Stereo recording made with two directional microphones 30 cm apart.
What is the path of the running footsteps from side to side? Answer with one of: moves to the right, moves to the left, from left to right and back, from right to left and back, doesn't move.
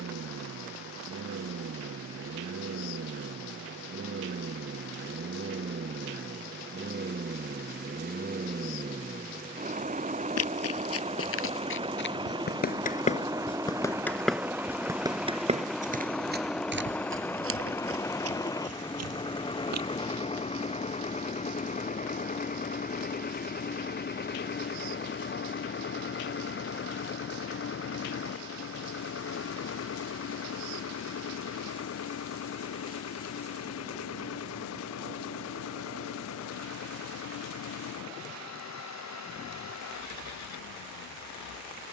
moves to the right.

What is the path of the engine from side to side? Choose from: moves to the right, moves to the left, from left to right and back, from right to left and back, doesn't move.
moves to the left.